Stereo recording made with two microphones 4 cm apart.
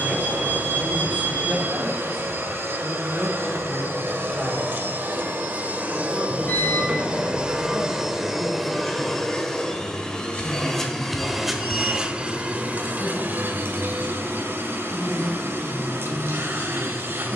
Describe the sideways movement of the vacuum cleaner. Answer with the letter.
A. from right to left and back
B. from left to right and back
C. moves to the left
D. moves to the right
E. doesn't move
A.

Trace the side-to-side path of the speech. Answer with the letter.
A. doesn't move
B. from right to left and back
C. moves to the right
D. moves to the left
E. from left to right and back
D.